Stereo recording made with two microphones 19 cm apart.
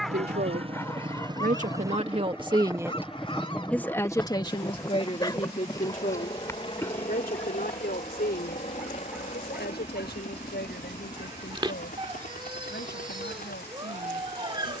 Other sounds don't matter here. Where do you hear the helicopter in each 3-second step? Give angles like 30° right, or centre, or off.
20° right, 10° left, 30° left, 40° left, 50° left.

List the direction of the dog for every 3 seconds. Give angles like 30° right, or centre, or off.
20° left, 20° left, 10° left, 20° right, 20° right.